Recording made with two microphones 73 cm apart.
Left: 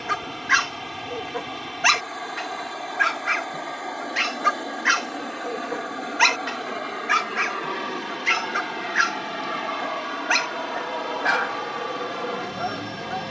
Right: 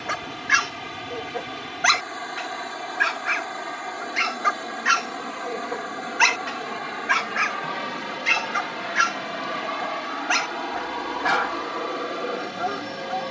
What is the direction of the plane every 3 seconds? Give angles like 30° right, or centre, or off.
50° right, 40° right, 20° right, 10° left, 30° left.